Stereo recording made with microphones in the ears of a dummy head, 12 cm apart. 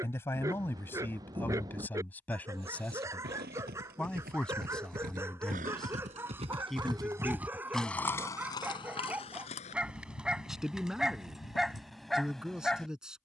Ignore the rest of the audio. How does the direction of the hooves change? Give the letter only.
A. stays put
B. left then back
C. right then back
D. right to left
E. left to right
D.